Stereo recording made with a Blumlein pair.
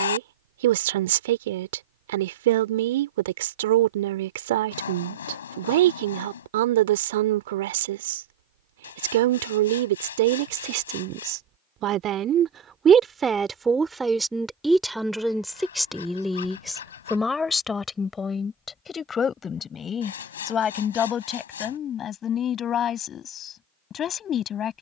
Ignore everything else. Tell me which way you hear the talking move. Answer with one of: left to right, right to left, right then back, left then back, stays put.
right to left.